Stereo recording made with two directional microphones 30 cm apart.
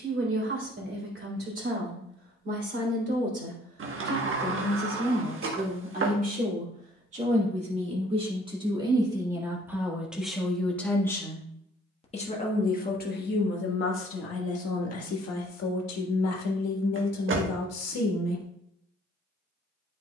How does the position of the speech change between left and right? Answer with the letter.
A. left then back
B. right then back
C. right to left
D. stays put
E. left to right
C.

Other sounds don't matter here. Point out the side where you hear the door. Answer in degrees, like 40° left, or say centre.
40° right.